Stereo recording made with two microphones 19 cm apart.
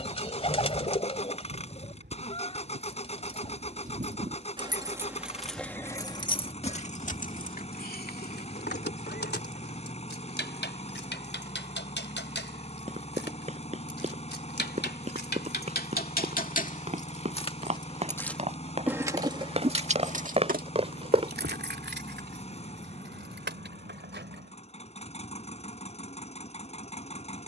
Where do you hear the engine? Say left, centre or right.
left.